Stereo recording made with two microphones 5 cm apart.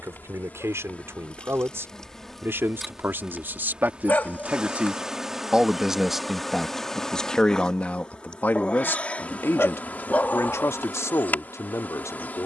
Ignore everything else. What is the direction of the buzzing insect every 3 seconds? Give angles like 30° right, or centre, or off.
20° left, 10° right, 10° left, 30° left.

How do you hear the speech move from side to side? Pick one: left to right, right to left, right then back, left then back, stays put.
right to left.